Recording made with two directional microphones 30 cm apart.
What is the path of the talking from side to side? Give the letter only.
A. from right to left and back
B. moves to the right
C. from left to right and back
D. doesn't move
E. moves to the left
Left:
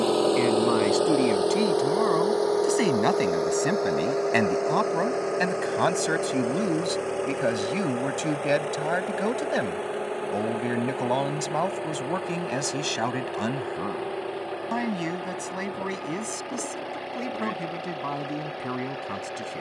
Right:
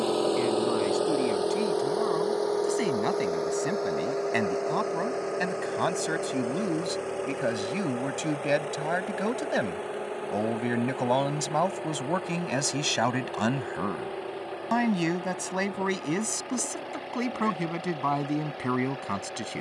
B.